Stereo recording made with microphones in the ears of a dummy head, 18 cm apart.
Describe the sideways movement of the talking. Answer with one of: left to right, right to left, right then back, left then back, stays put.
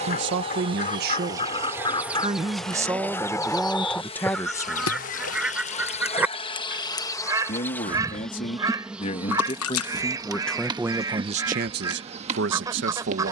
left then back.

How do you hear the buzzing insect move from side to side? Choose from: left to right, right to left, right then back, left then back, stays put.
left then back.